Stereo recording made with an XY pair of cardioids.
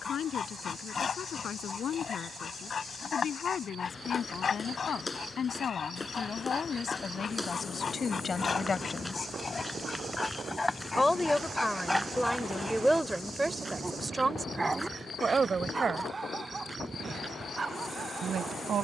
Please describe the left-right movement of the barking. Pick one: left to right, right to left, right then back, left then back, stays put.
left to right.